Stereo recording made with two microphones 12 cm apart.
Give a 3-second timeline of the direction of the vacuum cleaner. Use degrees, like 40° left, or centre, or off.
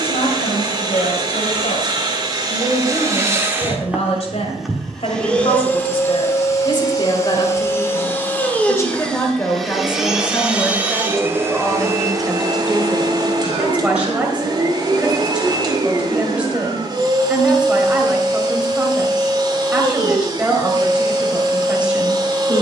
40° right, centre, 20° left, 10° right, 40° right, 40° right, 40° right, 40° right.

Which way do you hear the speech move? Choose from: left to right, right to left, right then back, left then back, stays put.
left to right.